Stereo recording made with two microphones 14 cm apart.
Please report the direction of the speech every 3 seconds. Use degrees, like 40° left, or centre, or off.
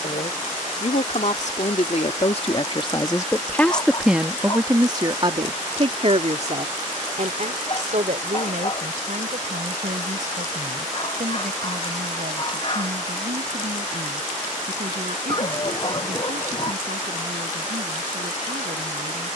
50° left, 10° right, 60° right, 70° right, 70° right, 80° right, 80° right.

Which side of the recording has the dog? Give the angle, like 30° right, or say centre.
40° left.